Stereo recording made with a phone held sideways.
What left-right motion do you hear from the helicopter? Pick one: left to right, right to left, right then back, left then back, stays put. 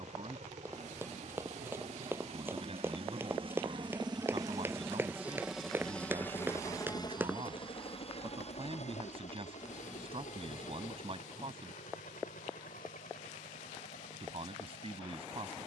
right to left.